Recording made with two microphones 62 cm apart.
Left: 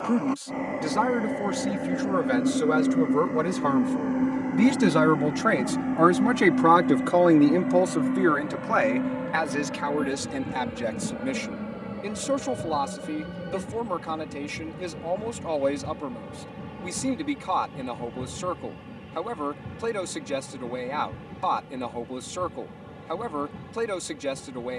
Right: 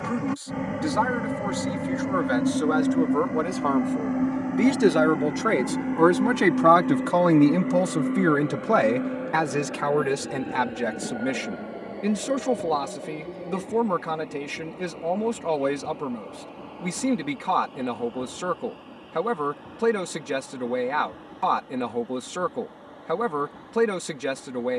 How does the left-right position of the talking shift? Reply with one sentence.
You can hear the talking travel towards the right.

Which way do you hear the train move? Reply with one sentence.
In this clip you hear the train move from right to left.